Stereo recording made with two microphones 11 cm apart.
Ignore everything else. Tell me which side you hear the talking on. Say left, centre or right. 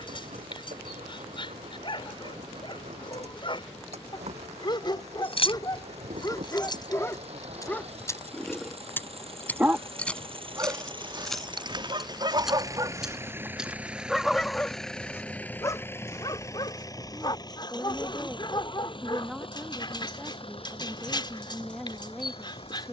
centre.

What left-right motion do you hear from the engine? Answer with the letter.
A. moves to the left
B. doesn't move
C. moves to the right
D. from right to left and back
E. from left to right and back
A.